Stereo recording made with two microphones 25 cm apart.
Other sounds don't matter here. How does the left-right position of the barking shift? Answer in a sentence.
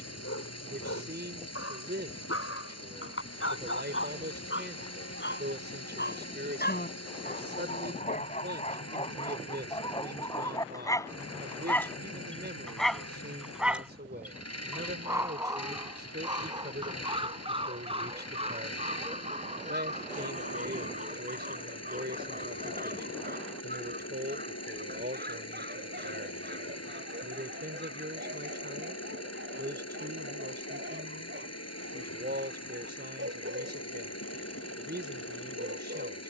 In this clip you hear the barking move to the right.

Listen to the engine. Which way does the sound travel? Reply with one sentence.
You can hear the engine stay in one place.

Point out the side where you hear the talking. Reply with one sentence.
In this clip you hear the talking on the right.